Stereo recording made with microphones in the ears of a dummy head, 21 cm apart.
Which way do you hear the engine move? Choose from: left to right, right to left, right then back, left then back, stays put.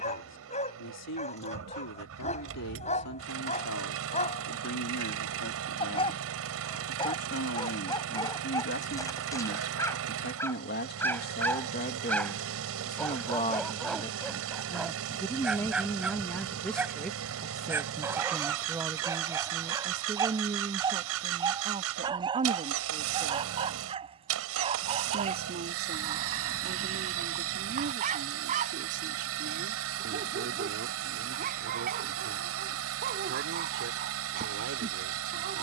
stays put.